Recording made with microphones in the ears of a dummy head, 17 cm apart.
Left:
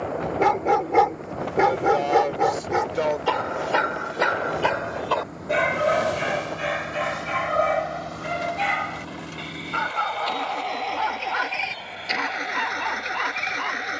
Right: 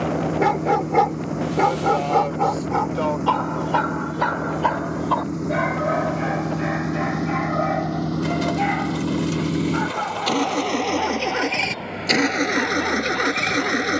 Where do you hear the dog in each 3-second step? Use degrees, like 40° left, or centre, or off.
10° left, 30° left, 50° left, 60° left, 60° left.